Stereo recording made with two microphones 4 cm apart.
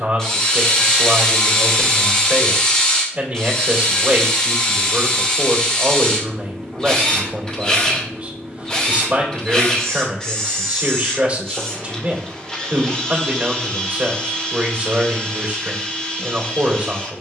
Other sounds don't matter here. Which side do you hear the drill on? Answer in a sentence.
You can hear the drill on the left.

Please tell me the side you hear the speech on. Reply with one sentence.
You can hear the speech on the right.